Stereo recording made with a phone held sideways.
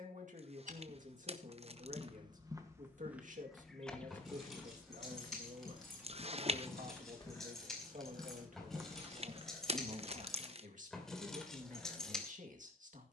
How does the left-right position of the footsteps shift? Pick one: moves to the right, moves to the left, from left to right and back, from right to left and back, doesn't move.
from right to left and back.